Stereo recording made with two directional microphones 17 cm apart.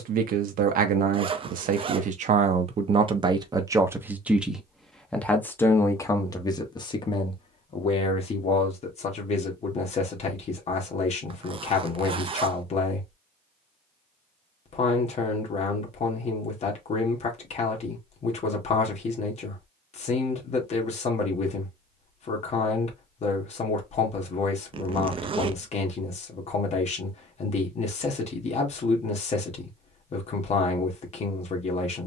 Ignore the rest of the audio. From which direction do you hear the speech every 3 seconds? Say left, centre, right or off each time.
right, centre, left, left, left, left, left, left, left, left, left.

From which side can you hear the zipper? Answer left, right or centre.
right.